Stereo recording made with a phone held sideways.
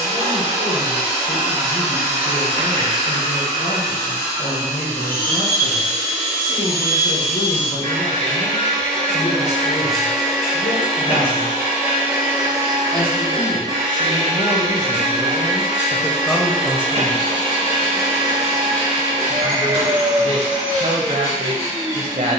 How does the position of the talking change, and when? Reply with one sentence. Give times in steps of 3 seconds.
You can hear the talking on the left from 0 s, in the centre from 15 s and on the right from 18 s.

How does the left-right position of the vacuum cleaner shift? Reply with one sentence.
In this clip you hear the vacuum cleaner move from left to right.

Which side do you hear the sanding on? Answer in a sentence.
You can hear the sanding on the left.